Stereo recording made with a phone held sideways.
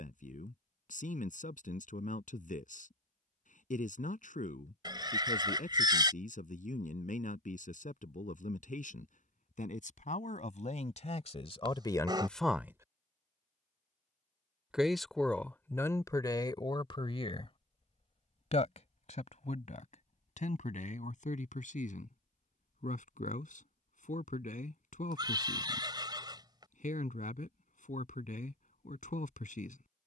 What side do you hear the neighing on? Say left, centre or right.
right.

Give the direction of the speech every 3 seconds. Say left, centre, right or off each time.
left, left, left, left, centre, left, left, left, left, left.